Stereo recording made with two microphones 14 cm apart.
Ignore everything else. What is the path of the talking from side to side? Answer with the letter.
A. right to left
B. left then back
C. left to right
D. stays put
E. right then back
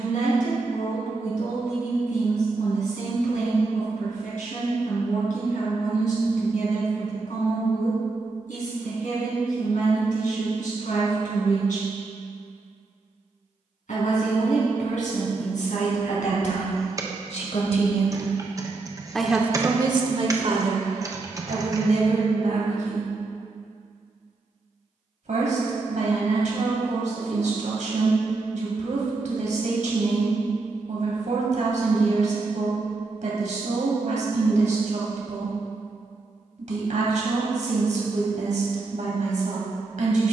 C.